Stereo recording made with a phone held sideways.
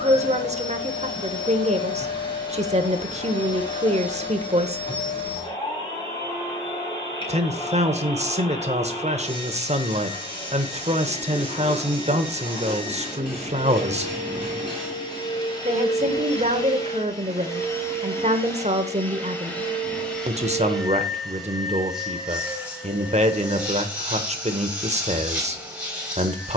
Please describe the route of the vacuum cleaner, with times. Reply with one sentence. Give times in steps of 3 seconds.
In this clip you hear the vacuum cleaner on the left from 0 s and in the centre from 18 s.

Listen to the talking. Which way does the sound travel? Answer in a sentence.
You can hear the talking stay put.